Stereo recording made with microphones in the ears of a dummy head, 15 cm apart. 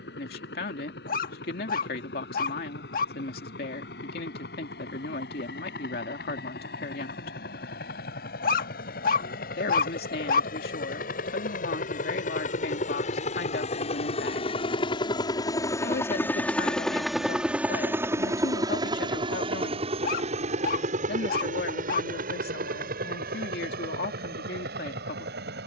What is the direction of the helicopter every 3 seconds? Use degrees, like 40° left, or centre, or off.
80° left, 70° left, 70° left, 60° left, 40° left, 10° left, 30° right, 50° right, 60° right.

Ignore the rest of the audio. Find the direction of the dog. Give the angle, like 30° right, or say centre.
60° left.